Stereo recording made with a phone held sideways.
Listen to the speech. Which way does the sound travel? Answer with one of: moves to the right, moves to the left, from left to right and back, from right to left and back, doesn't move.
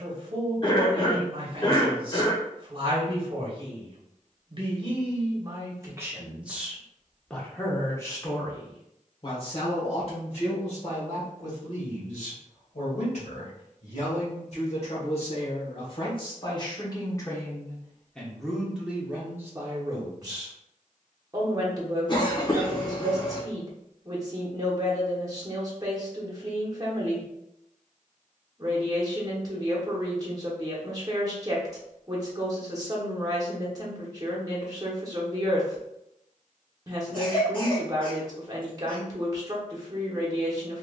from right to left and back.